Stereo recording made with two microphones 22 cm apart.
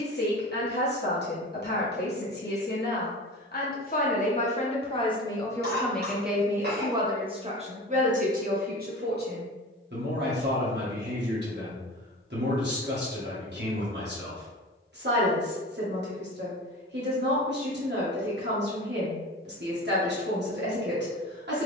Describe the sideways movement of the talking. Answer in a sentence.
In this clip you hear the talking move to the right.